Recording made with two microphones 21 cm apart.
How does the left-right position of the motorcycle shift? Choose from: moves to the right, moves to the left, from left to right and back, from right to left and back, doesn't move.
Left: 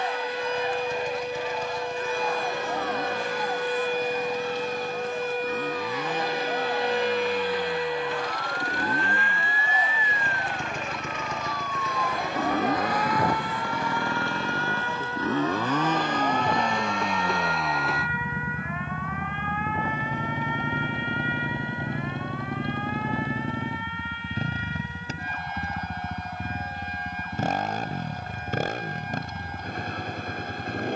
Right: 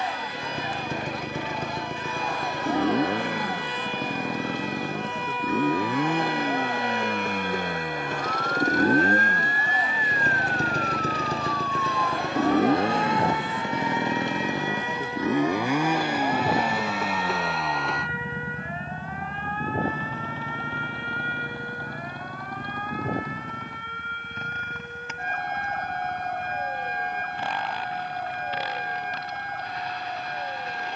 moves to the left.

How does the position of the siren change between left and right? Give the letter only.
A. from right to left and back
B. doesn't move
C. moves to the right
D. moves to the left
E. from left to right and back
C.